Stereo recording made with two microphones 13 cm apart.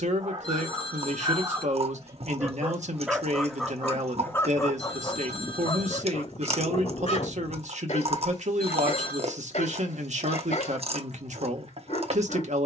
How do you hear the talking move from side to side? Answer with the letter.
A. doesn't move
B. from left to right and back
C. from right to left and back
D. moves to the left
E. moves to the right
A.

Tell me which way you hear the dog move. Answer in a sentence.
You can hear the dog move to the left.